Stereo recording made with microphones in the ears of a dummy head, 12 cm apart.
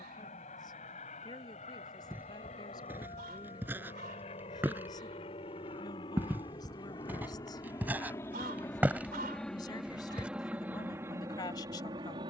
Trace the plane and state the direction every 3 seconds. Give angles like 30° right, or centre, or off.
60° left, 50° left, 30° left, 10° right.